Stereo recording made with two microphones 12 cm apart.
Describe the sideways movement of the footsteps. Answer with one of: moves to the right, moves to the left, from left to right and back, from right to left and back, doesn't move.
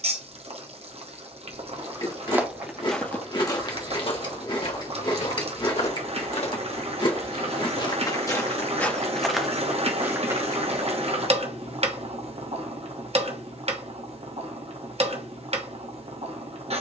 from right to left and back.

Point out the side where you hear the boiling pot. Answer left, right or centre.
right.